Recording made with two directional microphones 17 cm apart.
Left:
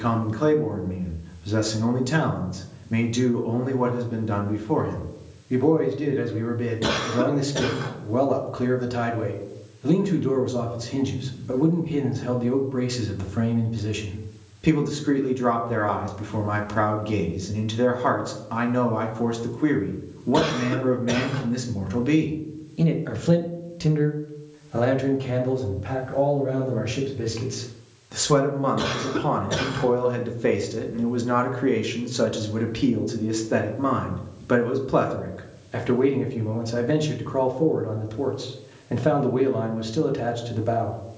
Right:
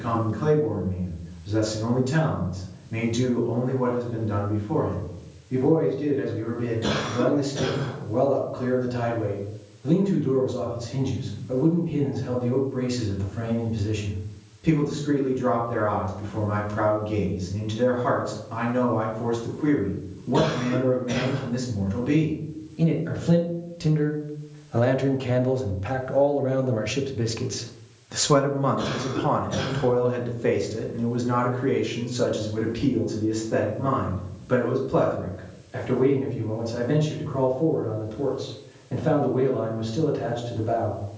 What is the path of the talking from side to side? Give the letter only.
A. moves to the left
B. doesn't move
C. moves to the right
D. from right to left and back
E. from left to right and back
E.